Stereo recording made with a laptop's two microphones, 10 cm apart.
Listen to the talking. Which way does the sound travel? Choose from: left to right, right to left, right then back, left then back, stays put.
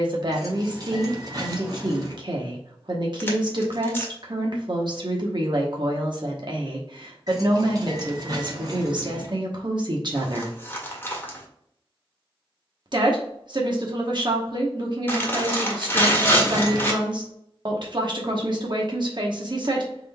stays put.